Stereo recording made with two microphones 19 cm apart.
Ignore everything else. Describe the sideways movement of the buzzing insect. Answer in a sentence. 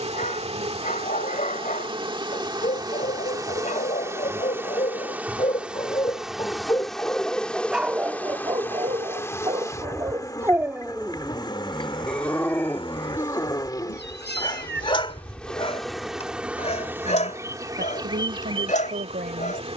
In this clip you hear the buzzing insect go left and come back.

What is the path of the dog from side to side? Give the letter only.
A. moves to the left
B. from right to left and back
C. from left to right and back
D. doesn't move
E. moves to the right
C.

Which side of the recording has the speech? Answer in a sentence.
In this clip you hear the speech on the right.